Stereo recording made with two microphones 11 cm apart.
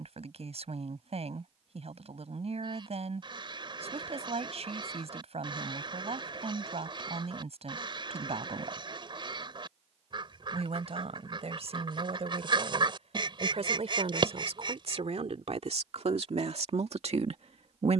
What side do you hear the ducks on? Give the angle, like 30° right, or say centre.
50° right.